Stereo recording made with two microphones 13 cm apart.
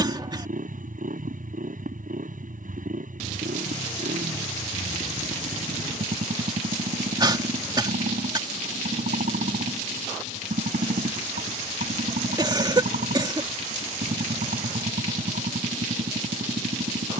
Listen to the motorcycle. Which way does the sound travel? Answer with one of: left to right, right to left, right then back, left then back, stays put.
stays put.